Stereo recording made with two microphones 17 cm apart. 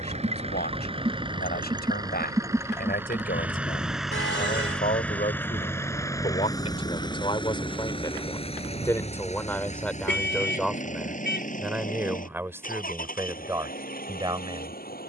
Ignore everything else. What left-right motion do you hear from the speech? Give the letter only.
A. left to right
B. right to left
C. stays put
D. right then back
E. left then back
A.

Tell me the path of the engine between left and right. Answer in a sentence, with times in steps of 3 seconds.
In this clip you hear the engine on the right from 0 s, in the centre from 3 s and on the left from 6 s.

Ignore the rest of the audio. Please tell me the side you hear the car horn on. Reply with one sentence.
You can hear the car horn on the left.